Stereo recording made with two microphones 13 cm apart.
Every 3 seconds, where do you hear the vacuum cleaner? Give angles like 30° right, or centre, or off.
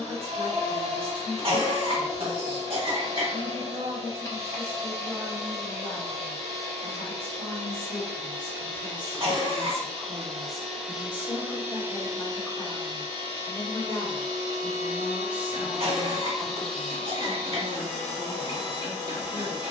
20° left, 20° left, 20° left, centre, 40° right, centre, 20° left.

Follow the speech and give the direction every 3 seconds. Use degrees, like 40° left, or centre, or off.
60° right, 60° right, 50° right, centre, 20° left, 30° right, 50° right.